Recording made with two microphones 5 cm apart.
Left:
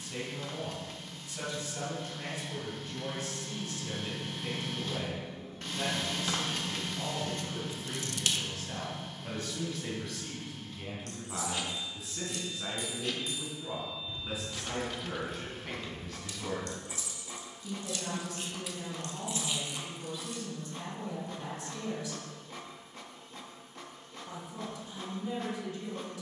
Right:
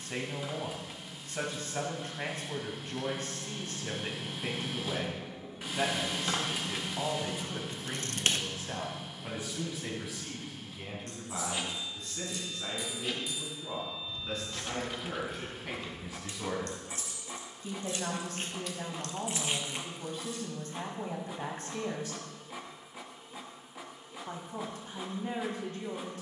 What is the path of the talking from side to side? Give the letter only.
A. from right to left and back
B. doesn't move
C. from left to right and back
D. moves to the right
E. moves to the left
A.